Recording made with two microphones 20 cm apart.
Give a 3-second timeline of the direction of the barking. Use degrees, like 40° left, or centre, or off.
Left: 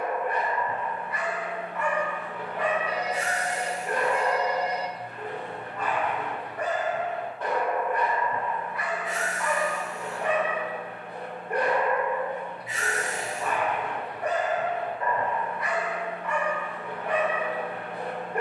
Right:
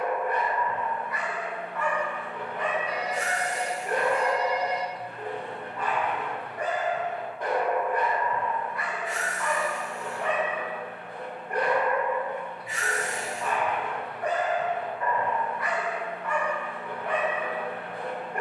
20° left, 20° right, 10° right, 20° left, 20° left, 20° left.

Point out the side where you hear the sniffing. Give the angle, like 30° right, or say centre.
20° left.